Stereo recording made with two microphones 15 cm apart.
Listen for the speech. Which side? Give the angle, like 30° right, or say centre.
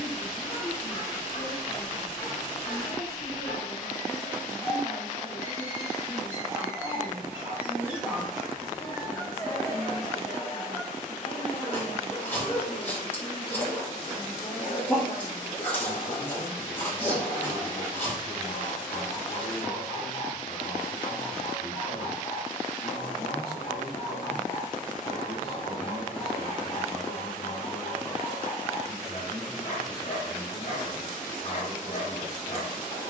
60° left.